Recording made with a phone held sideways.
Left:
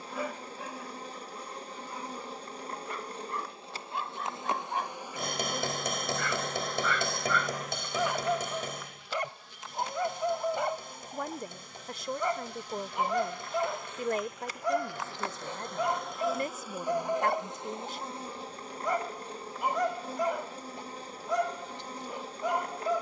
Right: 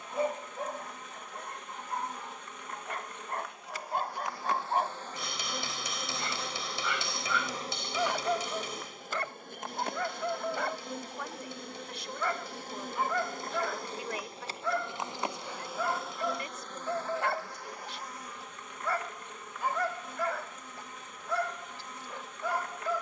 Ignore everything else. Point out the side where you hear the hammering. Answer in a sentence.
In this clip you hear the hammering on the left.